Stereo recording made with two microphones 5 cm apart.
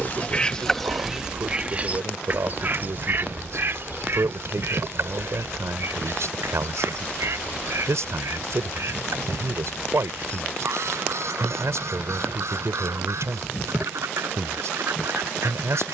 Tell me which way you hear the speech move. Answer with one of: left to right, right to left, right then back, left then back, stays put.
stays put.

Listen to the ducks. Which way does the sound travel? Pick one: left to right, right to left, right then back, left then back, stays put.
left to right.